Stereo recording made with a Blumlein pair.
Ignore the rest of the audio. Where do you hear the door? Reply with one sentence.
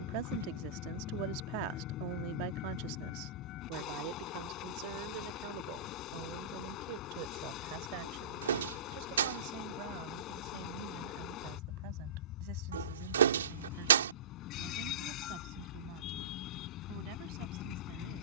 In this clip you hear the door on the right.